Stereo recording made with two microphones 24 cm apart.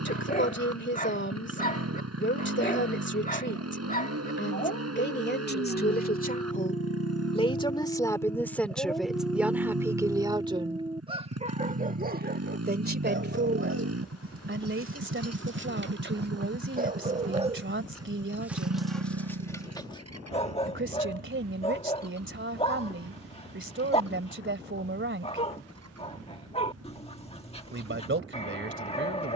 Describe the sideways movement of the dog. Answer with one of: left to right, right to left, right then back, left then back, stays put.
right then back.